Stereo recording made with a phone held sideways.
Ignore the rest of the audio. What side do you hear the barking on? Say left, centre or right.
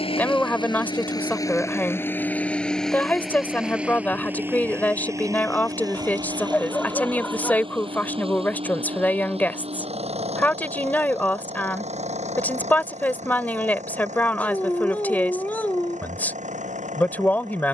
centre.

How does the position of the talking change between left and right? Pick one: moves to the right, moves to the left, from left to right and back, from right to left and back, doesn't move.
doesn't move.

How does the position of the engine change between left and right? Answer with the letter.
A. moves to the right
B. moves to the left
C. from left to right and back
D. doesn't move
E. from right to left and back
A.